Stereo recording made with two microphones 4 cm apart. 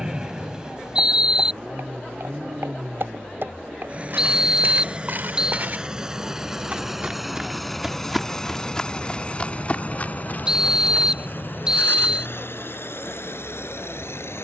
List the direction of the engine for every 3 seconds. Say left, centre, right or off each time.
right, right, centre, left, left.